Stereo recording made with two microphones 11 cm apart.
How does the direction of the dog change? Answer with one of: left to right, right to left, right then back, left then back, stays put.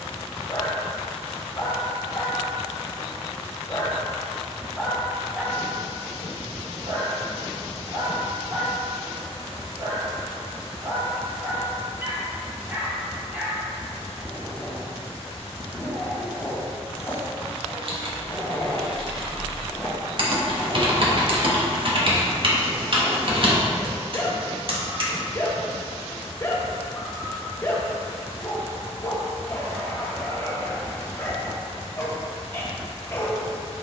right then back.